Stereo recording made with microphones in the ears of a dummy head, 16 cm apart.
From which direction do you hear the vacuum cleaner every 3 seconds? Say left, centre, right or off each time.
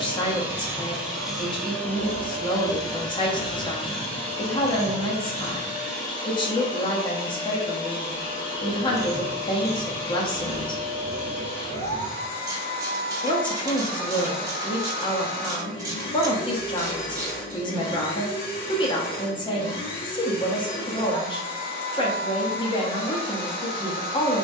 centre, left, left, left, left, left, left, left.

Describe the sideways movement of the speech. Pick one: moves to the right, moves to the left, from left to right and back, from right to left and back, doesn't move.
doesn't move.